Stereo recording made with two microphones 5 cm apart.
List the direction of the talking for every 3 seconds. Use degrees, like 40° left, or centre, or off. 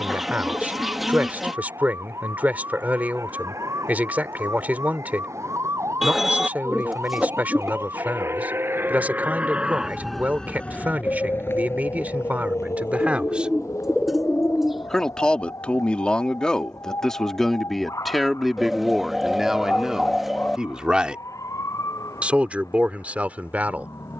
30° right, 30° right, 30° right, 30° right, 20° right, 20° left, 10° right, 30° right.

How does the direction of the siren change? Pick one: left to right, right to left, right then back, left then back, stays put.
right to left.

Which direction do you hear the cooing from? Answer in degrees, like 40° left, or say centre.
centre.